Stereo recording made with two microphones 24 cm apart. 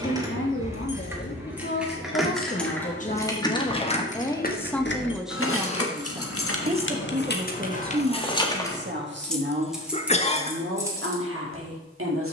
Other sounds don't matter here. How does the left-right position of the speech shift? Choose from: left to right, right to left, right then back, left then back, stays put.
left to right.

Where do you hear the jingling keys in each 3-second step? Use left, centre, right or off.
centre, left, left, centre.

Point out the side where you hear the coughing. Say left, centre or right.
left.